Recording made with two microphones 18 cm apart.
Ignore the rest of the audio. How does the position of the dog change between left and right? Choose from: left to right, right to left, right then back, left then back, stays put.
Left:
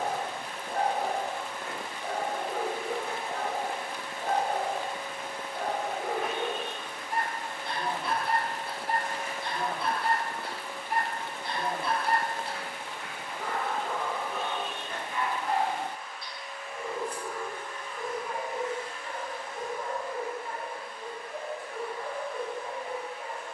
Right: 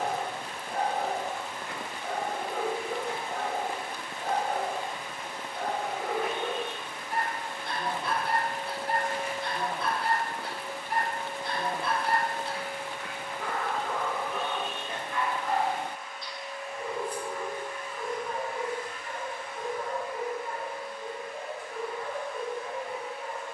stays put.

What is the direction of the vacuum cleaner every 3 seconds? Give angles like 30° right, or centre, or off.
70° left, 60° left, 20° left, 50° right, 70° right, 40° right, 40° left, 60° left.